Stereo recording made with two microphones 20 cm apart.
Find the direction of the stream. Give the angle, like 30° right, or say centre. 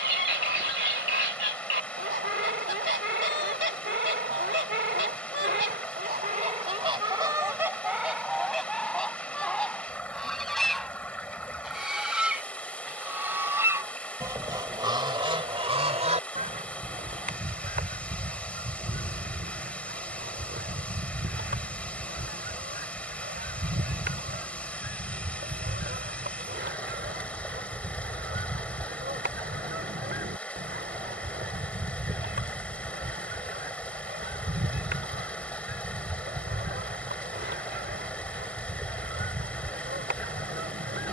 10° left.